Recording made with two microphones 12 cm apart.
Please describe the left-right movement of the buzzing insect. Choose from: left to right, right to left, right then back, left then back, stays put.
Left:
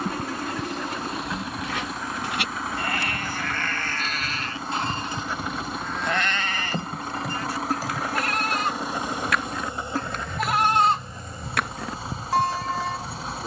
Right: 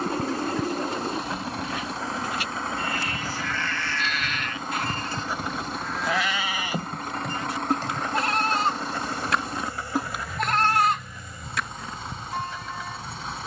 right to left.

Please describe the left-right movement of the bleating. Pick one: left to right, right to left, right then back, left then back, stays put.
right then back.